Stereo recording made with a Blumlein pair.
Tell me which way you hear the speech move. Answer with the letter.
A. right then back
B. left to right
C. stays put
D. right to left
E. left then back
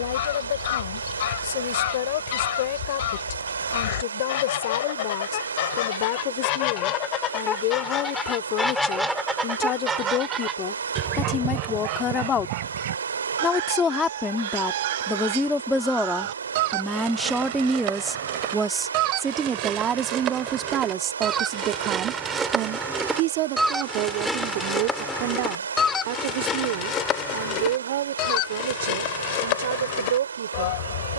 B.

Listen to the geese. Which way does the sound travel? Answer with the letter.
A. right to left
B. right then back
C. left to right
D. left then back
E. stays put
B.